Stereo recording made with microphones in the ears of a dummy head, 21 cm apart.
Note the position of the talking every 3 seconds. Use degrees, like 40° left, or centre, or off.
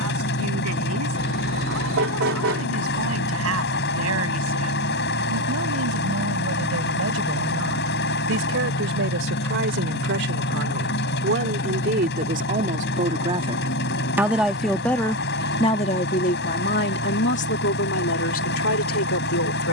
70° right, 70° right, 60° right, 50° right, 20° right, 40° left, 60° left.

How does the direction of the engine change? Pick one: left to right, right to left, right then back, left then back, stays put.
stays put.